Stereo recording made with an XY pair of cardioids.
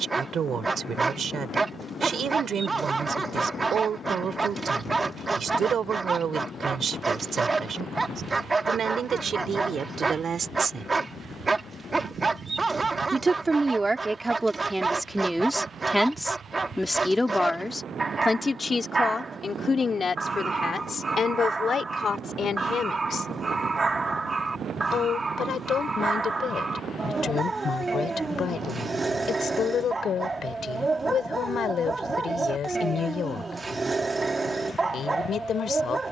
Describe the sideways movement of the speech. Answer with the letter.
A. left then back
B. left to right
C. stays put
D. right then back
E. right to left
E.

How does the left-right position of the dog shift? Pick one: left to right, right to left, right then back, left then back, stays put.
stays put.